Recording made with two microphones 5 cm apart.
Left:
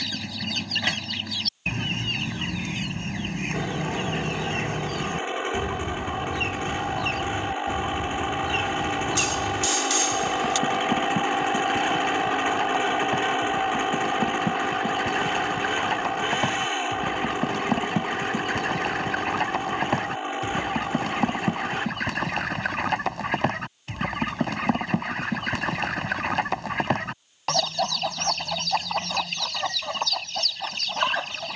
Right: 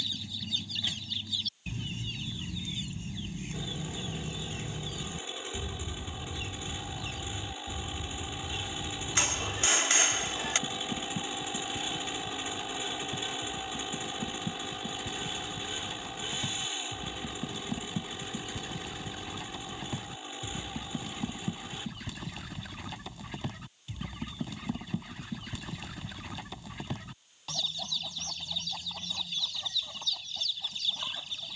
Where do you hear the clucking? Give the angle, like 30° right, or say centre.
70° left.